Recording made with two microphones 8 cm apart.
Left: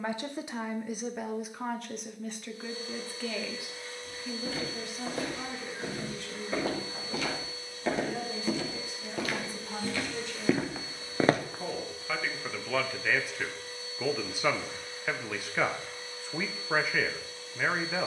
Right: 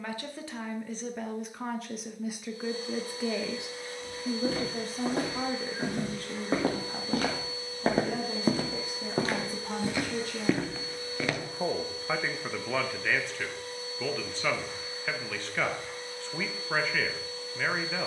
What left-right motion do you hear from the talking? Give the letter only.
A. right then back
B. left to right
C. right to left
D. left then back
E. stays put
A.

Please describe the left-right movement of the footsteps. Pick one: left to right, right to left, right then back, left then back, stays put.
right to left.